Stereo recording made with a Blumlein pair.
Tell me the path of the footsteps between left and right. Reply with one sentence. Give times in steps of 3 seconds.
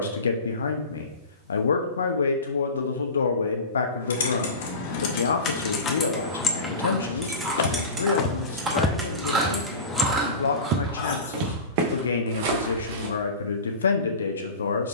In this clip you hear the footsteps not at all from 0 s, on the left from 6 s and on the right from 9 s.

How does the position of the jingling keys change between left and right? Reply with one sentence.
In this clip you hear the jingling keys move from left to right and back again.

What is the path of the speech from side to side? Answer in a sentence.
In this clip you hear the speech stay in one place.